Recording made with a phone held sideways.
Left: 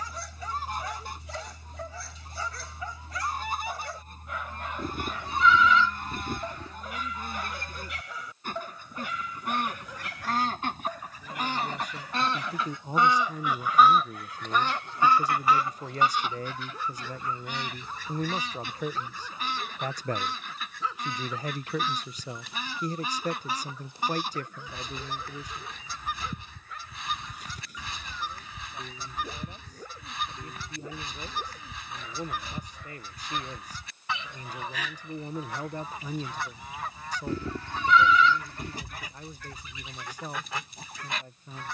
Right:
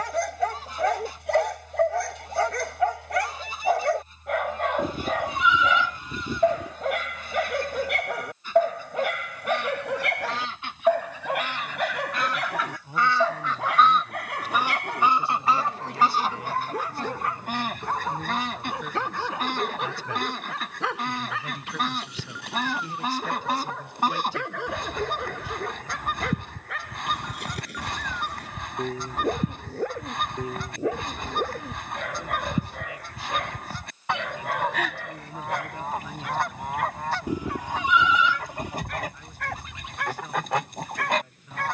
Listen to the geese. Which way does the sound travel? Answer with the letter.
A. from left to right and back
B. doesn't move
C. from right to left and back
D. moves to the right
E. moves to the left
D.